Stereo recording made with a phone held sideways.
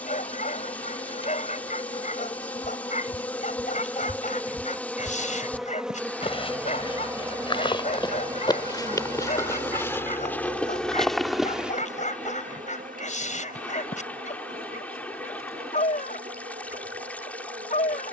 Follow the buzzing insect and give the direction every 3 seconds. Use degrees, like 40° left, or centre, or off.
30° left, 10° left, 20° right, 40° right, 60° right, 70° right.